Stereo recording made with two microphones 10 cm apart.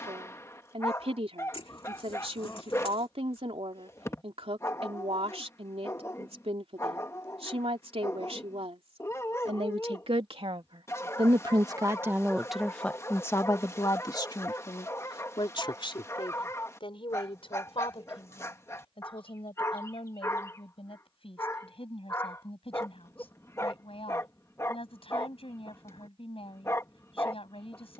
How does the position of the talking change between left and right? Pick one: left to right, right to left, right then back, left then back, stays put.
right to left.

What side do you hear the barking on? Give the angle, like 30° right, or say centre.
30° left.